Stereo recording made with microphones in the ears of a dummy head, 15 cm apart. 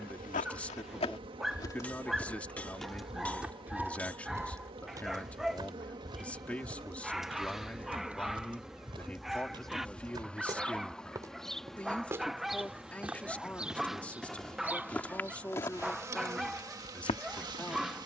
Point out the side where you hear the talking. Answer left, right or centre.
centre.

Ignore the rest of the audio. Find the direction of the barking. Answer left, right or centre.
centre.